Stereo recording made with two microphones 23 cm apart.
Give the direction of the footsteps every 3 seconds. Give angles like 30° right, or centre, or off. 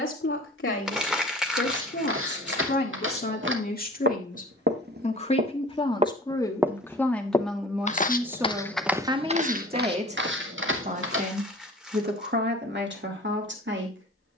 60° right, 50° right, 10° left, 50° right, off.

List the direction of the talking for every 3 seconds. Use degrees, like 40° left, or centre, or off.
50° left, 40° left, centre, 30° right, 50° right.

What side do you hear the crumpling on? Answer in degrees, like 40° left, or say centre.
centre.